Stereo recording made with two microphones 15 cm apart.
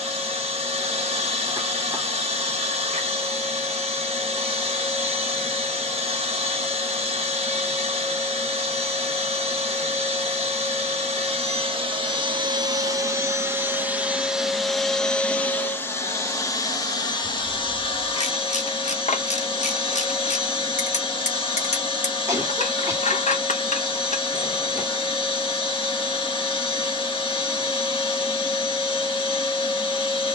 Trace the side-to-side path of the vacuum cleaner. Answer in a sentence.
You can hear the vacuum cleaner go from the right side to the left.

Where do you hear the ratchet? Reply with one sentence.
In this clip you hear the ratchet on the left.